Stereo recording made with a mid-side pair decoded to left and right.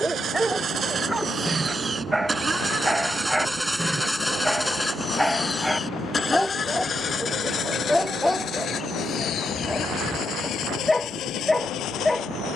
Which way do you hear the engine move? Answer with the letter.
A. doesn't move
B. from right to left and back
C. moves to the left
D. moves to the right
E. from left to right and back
C.